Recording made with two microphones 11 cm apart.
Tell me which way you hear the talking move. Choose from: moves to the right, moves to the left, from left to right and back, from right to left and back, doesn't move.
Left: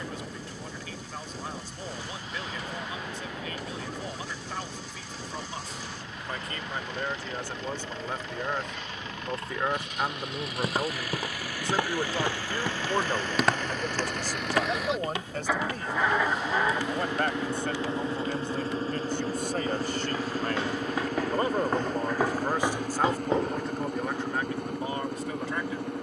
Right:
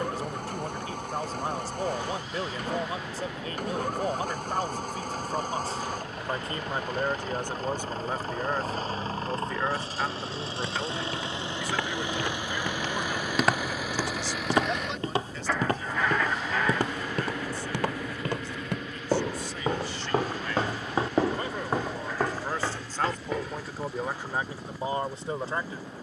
from right to left and back.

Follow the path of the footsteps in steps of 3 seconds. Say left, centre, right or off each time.
off, off, off, left, centre, right, right, centre, off.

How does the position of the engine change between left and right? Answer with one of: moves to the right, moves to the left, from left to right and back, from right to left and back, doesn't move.
moves to the left.